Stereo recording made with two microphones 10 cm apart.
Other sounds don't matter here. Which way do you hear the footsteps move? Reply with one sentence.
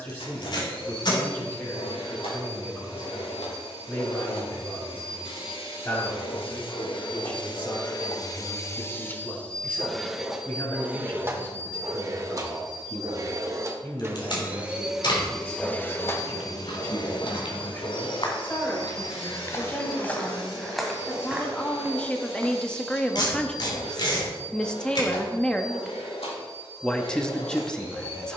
In this clip you hear the footsteps move from left to right.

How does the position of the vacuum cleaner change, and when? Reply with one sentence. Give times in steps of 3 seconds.
You can hear the vacuum cleaner on the left from 0 s, in the centre from 9 s, on the right from 12 s and on the left from 15 s.